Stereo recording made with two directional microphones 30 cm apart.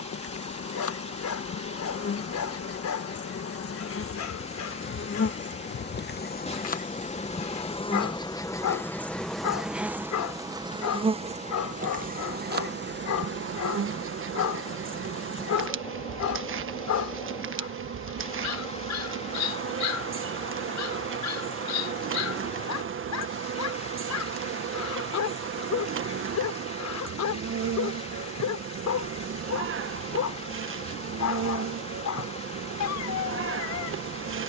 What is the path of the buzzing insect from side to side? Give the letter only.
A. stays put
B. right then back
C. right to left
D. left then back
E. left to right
E.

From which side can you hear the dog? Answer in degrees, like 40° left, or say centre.
60° left.